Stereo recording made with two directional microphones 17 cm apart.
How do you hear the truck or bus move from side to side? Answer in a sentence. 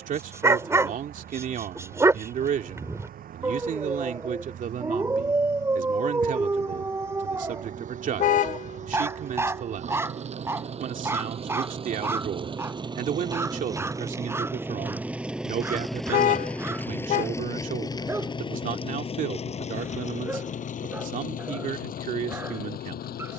In this clip you hear the truck or bus move to the left.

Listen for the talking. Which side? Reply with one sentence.
You can hear the talking on the right.